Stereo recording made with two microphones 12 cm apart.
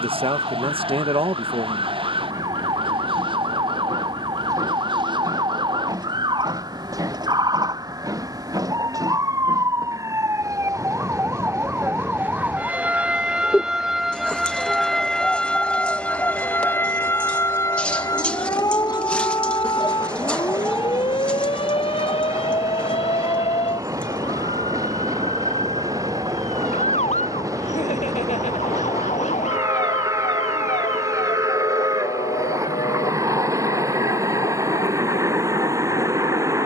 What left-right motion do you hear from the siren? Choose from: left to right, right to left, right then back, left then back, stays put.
right to left.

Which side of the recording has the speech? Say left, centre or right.
right.